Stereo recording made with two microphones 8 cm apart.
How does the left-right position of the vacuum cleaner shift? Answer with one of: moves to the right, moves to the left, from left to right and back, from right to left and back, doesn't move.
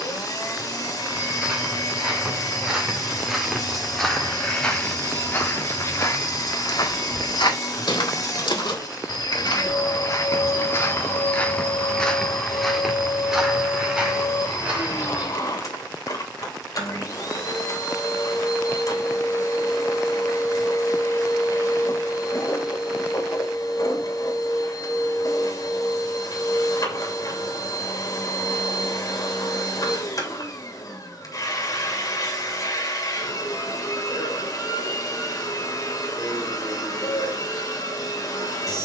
doesn't move.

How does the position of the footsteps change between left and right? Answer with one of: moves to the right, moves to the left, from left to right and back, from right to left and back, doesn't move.
from right to left and back.